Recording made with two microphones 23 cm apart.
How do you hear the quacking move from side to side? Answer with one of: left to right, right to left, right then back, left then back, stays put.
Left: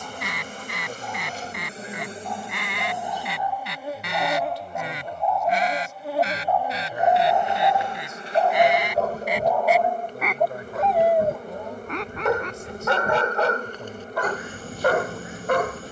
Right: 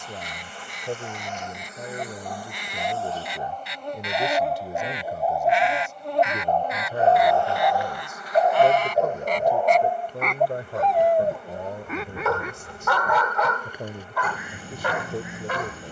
left to right.